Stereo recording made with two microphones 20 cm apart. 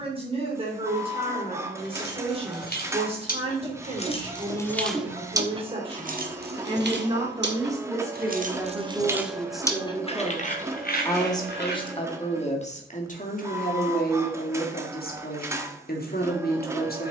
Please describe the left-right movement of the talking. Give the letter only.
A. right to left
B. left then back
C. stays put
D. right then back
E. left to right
A.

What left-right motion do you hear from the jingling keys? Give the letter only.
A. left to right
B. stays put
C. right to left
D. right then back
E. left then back
D.